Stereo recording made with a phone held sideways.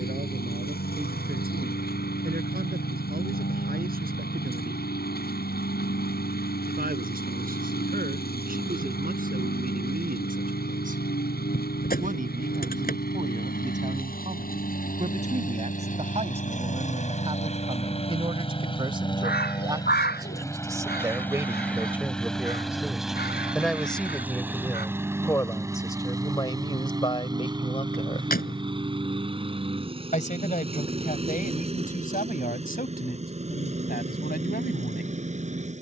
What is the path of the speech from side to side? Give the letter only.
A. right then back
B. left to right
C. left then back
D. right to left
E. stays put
D.